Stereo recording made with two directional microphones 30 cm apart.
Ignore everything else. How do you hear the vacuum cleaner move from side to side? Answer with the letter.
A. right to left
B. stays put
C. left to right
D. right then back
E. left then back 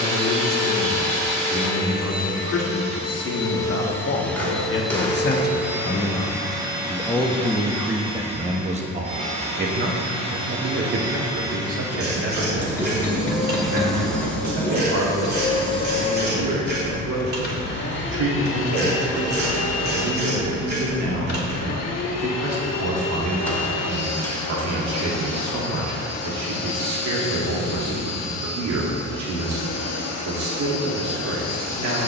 D.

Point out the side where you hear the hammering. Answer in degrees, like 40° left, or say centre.
10° left.